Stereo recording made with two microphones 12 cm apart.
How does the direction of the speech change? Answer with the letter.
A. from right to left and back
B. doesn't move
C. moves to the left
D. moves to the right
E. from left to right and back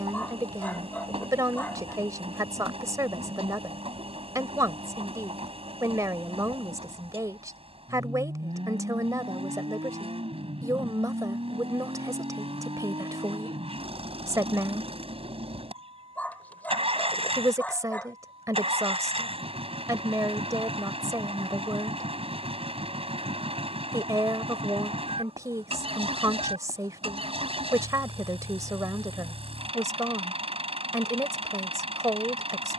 B.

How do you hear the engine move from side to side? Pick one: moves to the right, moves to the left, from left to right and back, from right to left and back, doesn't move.
doesn't move.